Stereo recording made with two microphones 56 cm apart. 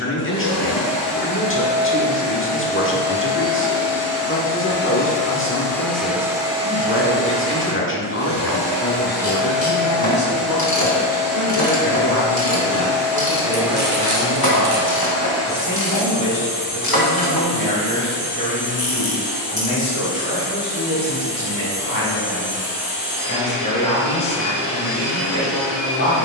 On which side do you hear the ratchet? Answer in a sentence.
You can hear the ratchet on the left.